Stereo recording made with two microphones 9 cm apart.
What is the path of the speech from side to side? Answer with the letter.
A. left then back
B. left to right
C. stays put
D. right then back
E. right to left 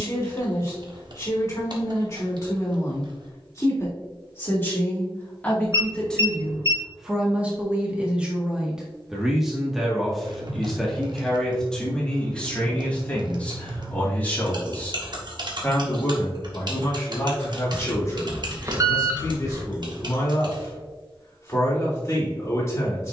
D.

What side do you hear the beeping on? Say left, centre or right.
right.